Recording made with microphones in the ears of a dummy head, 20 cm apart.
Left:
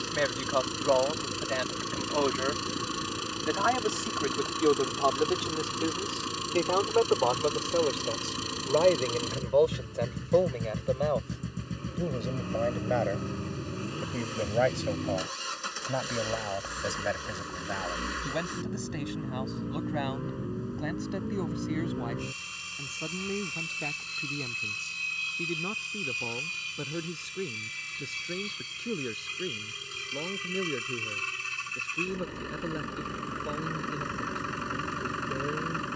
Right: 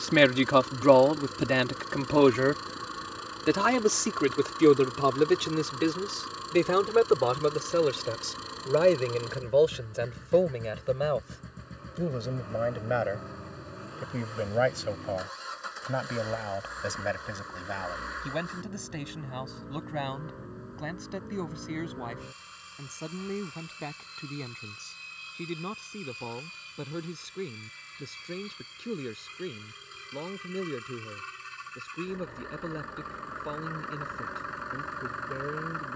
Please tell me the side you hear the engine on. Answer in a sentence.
You can hear the engine on the left.